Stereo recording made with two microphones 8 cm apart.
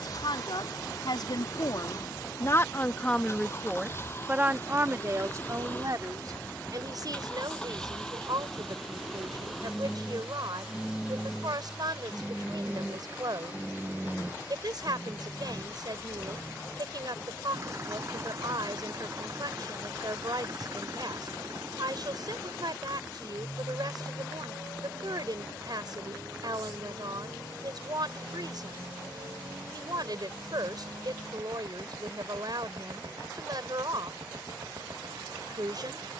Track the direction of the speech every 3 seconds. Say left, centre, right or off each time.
left, right, right, right, right, right, right, right, right, right, right, right.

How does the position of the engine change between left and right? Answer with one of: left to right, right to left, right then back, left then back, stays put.
left to right.